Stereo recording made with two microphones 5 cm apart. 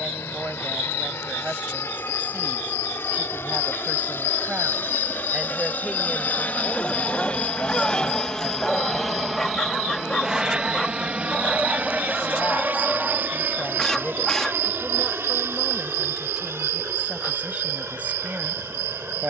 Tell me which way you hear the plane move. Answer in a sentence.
You can hear the plane go from the left side to the right.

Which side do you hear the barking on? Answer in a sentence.
In this clip you hear the barking in the centre.